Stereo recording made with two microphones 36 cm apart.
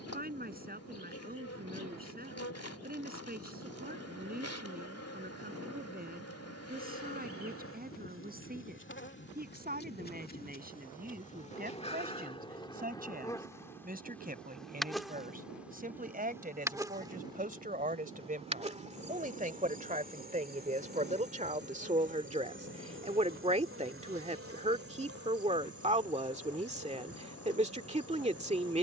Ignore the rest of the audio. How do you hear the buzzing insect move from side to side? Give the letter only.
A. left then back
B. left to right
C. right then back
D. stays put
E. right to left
B.